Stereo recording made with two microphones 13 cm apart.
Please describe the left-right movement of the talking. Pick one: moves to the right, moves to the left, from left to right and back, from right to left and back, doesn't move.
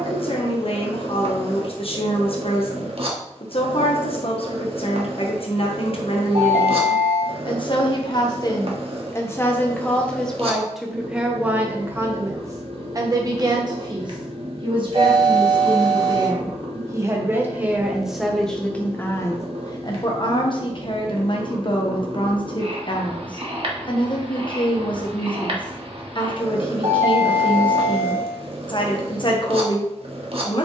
from left to right and back.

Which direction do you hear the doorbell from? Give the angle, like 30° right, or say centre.
70° right.